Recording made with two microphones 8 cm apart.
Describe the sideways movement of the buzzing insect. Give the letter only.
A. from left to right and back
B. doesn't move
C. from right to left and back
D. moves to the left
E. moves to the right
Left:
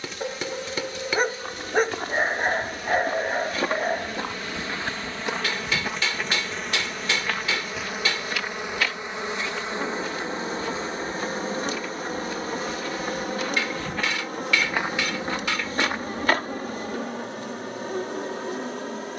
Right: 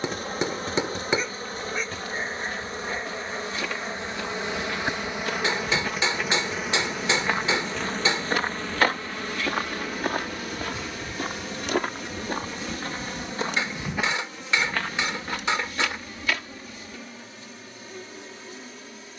D.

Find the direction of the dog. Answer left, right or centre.
left.